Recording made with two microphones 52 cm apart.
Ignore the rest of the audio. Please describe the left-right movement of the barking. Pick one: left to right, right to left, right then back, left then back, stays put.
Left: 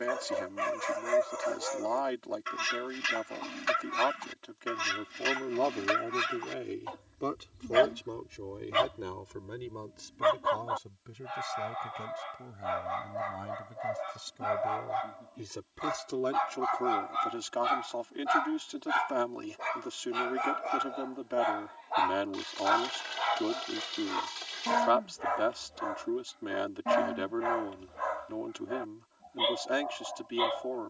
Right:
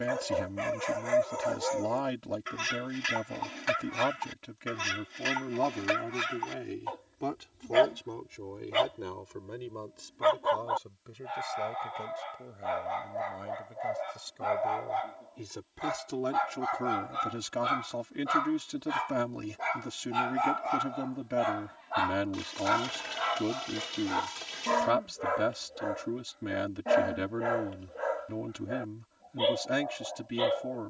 right then back.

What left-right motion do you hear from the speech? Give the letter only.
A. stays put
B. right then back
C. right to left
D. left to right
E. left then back
E.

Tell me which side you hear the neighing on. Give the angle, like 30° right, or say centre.
60° right.